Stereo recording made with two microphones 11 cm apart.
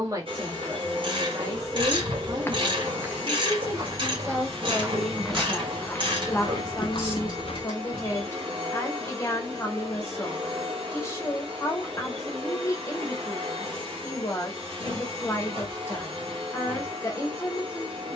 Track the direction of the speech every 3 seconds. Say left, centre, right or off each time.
right, centre, left, left, left, left.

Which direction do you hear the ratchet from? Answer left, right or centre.
right.